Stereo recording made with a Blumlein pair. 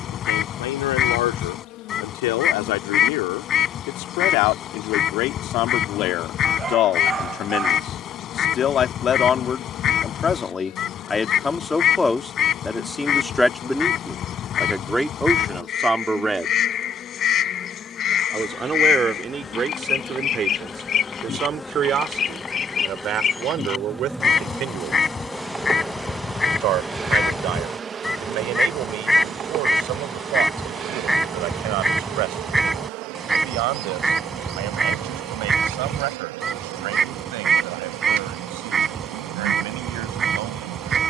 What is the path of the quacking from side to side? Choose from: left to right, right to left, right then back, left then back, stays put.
left to right.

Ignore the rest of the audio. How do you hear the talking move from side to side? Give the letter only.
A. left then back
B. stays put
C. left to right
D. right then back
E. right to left
C.